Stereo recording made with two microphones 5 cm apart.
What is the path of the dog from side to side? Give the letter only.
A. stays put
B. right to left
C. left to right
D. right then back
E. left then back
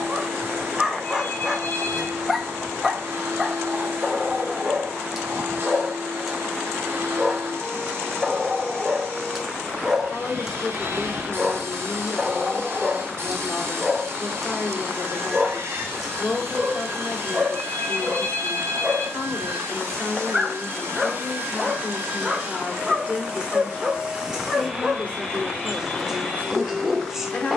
A.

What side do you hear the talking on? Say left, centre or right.
left.